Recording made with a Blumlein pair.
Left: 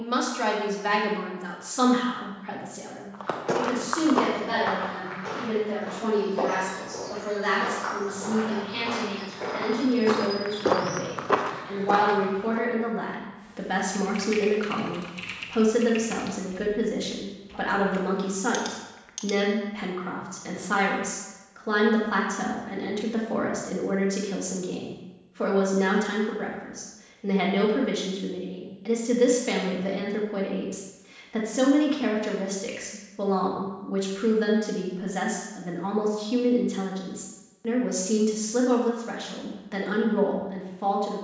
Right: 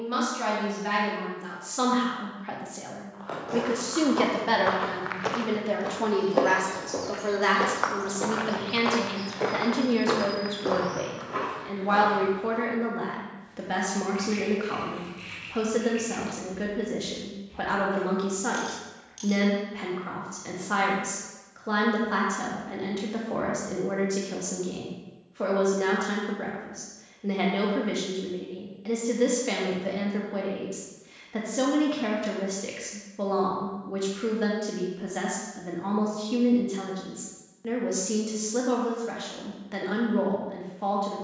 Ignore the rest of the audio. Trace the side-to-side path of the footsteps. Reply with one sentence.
You can hear the footsteps move from left to right and back again.